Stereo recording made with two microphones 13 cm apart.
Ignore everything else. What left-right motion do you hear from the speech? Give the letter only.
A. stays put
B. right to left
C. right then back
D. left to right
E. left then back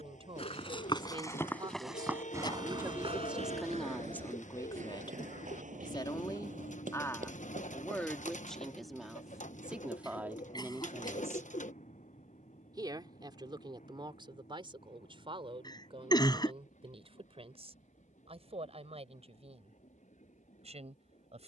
E.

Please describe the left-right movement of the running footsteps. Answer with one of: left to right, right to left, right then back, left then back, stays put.
left to right.